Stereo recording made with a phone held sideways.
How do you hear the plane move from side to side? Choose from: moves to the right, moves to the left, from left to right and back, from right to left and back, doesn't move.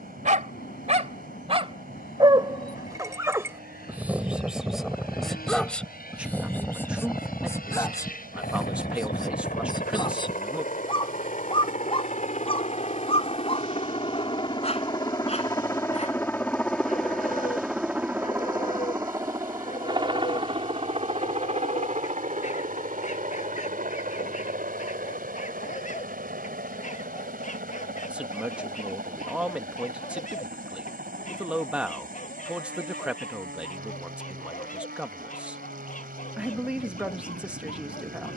moves to the right.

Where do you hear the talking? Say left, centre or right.
centre.